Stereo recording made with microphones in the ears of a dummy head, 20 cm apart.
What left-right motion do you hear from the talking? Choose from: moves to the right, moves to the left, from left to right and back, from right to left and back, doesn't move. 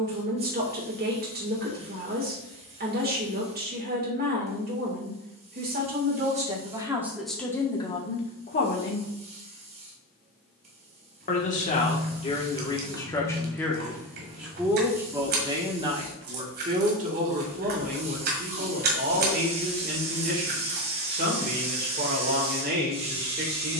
from right to left and back.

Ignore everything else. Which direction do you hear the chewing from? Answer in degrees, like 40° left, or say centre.
40° right.